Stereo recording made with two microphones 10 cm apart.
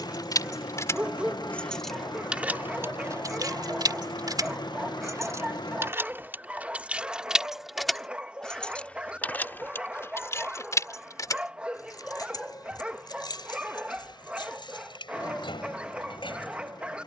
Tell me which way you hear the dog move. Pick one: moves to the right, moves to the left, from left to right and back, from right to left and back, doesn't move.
doesn't move.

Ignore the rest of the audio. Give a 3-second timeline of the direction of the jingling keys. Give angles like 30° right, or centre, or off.
10° left, 40° right, 10° right, 30° left, 50° left, 60° left.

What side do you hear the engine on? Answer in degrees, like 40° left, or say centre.
50° left.